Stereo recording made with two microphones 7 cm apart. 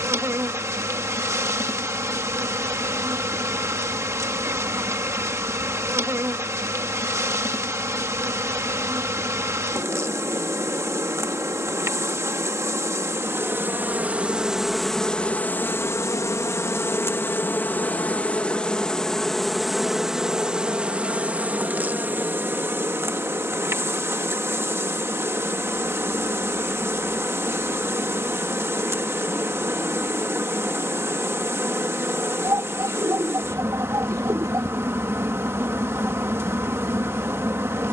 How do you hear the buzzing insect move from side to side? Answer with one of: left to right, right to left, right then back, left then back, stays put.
left then back.